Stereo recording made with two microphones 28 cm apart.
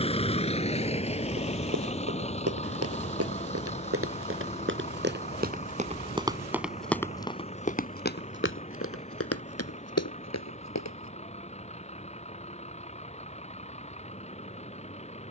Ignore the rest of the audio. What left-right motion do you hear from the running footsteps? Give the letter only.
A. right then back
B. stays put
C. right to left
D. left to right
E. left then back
C.